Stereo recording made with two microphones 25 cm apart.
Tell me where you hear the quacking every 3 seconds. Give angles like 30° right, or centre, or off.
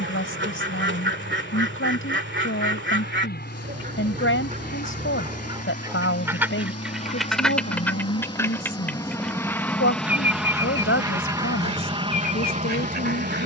50° right, 30° right, centre, 10° right, 40° right.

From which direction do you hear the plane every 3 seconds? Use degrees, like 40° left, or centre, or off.
50° left, 40° left, 20° left, centre, 30° right.